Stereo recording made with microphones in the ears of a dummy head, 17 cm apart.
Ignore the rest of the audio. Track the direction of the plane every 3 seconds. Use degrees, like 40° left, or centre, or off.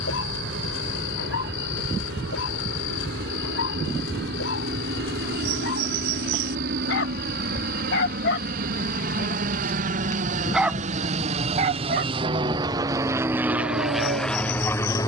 70° right, 60° right, 60° right, 50° right, 10° right.